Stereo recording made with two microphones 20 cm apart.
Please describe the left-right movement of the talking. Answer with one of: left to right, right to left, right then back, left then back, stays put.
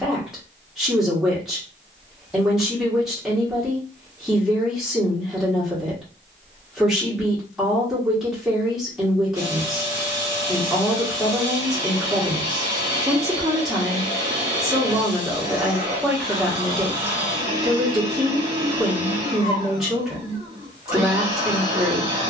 stays put.